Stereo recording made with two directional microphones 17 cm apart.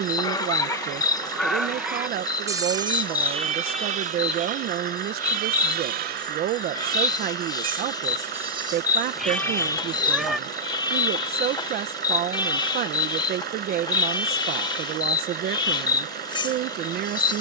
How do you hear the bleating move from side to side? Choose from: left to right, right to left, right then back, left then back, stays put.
right then back.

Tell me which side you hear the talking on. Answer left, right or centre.
right.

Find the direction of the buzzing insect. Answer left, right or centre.
left.